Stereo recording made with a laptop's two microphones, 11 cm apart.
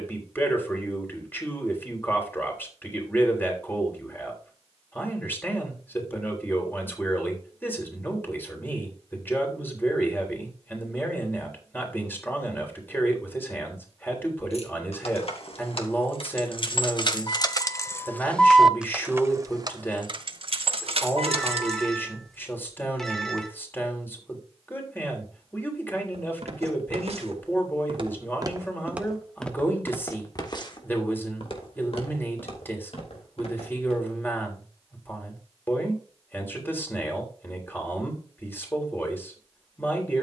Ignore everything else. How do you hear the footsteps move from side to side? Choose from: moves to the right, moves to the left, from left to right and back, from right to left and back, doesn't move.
moves to the left.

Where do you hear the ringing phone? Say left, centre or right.
centre.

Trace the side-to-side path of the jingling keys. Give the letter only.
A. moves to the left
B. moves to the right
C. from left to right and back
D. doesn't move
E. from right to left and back
B.